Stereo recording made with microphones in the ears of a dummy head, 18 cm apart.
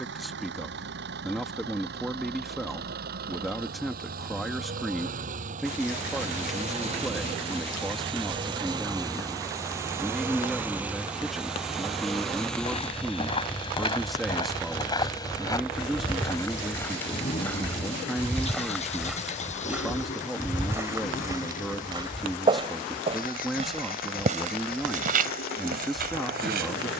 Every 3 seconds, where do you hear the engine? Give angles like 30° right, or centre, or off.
60° right, 50° right, 30° right, 10° right, 10° left, 20° left, 30° left, 40° left, 50° left.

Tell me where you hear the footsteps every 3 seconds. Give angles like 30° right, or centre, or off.
off, off, off, off, 30° left, 20° left, centre, 30° right, 40° right.